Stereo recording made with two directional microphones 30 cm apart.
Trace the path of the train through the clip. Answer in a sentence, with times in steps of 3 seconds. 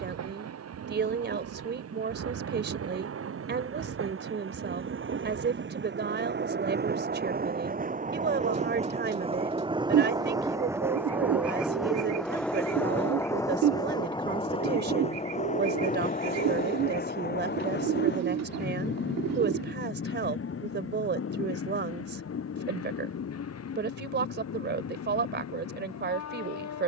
In this clip you hear the train on the right from 0 s, in the centre from 9 s and on the left from 15 s.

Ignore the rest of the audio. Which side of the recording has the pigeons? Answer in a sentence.
You can hear the pigeons on the right.